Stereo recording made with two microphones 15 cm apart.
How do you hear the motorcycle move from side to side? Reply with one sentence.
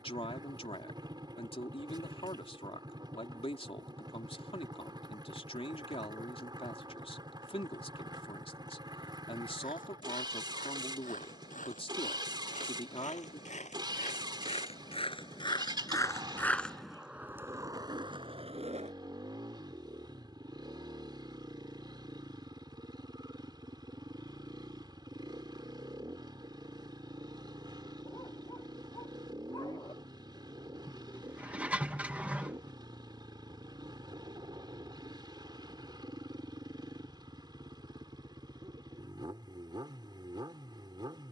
In this clip you hear the motorcycle stay put.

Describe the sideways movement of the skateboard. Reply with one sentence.
In this clip you hear the skateboard travel towards the right.